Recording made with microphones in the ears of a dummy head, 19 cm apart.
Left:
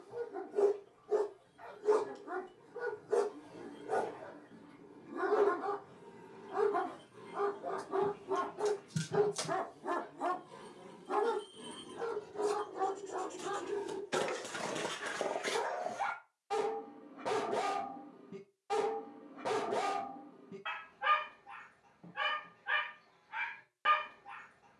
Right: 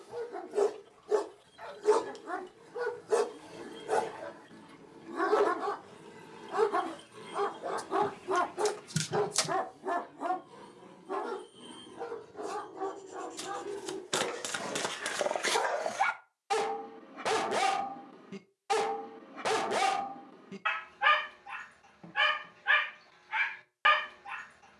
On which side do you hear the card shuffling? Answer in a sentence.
In this clip you hear the card shuffling on the right.